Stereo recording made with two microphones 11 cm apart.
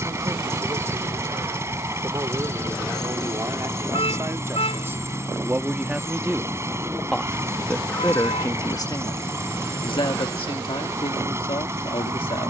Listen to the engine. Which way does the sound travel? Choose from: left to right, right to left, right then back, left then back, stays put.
stays put.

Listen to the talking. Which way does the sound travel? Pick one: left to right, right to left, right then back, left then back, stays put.
right to left.